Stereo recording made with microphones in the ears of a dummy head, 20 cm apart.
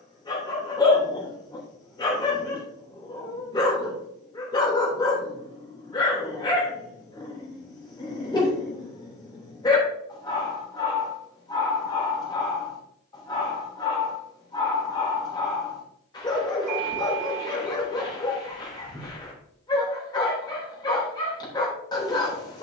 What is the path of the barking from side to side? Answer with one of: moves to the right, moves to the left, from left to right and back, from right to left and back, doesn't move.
doesn't move.